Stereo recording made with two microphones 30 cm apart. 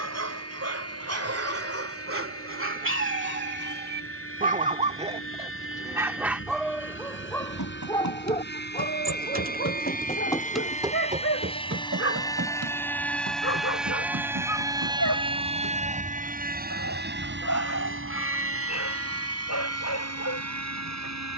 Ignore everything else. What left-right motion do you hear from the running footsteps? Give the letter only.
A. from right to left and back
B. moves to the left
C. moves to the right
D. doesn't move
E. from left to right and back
C.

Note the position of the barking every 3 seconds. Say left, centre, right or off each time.
right, right, centre, left, left, left, left.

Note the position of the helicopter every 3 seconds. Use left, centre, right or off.
left, left, left, left, centre, right, right.